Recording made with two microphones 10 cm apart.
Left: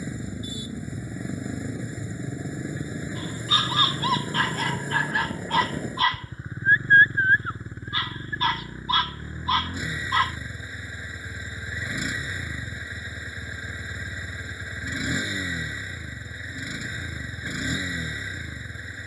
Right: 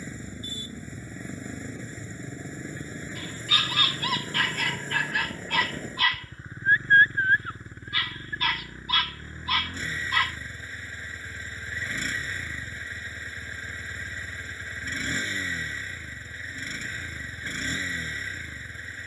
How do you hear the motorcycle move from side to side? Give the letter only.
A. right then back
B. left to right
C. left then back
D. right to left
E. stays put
E.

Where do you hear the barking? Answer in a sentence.
You can hear the barking on the left.